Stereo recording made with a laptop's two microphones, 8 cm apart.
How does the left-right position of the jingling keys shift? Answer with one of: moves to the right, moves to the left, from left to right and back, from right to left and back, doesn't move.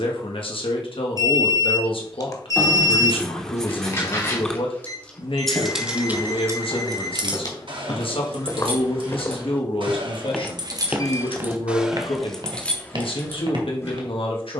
from left to right and back.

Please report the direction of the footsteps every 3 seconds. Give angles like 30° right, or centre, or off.
off, 60° left, 50° left, centre, 60° right.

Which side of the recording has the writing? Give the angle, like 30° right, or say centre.
10° left.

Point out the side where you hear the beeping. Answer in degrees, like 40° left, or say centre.
40° left.